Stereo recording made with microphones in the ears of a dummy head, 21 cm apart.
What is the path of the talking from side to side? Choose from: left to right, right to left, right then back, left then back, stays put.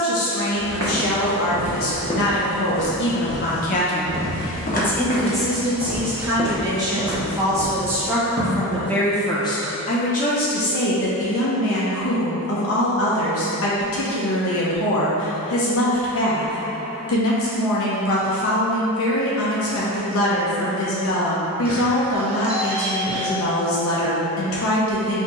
right then back.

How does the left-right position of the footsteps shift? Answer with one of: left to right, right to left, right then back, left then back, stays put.
left then back.